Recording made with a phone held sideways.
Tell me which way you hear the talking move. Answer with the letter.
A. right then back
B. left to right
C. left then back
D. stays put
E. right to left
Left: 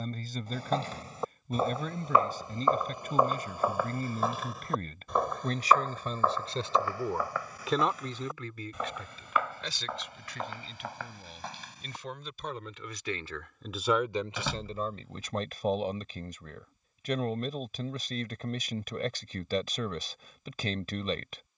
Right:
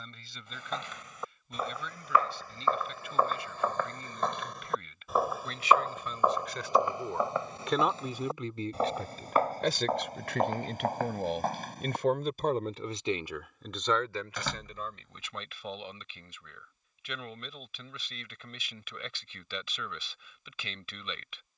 A.